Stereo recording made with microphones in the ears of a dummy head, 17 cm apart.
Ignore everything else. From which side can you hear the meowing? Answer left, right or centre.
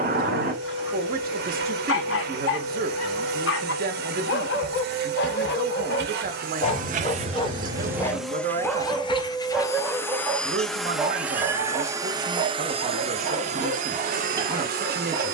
right.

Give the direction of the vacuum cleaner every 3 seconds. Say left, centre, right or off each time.
right, right, right, centre, right.